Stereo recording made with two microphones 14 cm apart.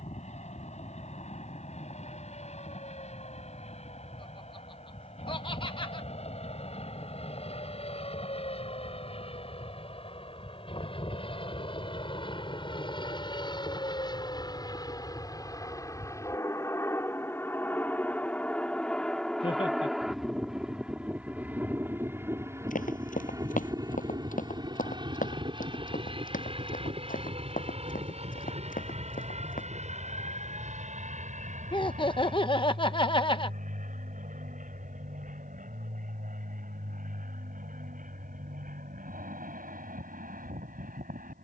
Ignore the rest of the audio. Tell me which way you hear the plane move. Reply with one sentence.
In this clip you hear the plane go from the left side to the right.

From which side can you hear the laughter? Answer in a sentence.
You can hear the laughter on the left.